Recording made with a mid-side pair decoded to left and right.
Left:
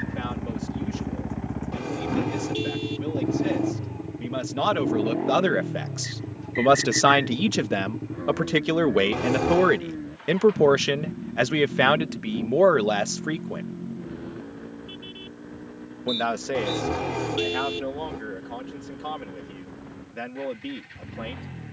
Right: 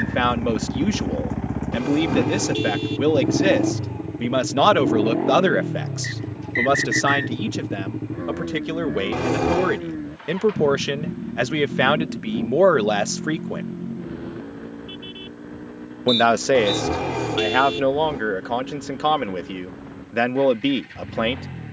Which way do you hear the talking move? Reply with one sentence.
In this clip you hear the talking go left and come back.